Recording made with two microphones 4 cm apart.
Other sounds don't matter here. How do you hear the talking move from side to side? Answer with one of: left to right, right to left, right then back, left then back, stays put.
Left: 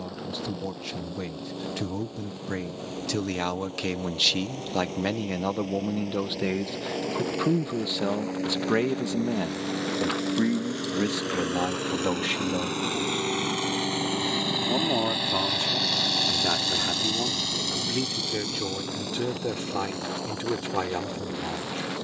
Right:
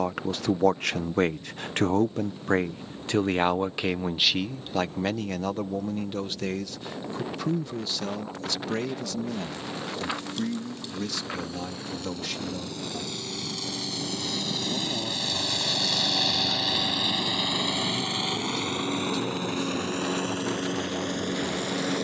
right to left.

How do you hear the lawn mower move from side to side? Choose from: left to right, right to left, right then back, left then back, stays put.
left to right.